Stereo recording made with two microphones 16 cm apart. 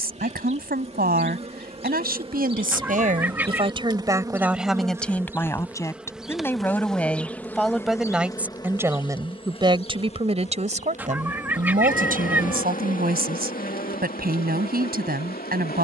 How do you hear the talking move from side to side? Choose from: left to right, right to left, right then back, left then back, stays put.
left then back.